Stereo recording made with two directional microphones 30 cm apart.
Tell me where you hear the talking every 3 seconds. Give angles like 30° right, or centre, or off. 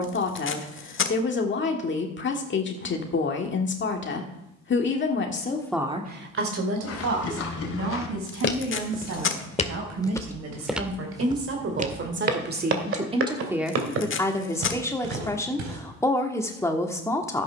40° left, 30° left, 60° right, 50° right, 10° right, 10° left.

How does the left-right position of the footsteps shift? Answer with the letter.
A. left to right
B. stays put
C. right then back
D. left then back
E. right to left
A.